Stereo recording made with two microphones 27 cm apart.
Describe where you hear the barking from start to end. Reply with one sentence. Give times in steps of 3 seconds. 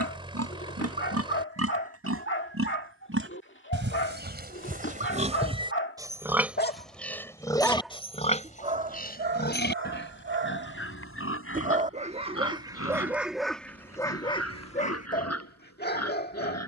You can hear the barking on the left from 0 s, in the centre from 6 s, on the right from 9 s, in the centre from 12 s and on the left from 15 s.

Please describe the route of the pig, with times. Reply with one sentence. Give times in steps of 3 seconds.
You can hear the pig on the right from 0 s, in the centre from 6 s and on the left from 9 s.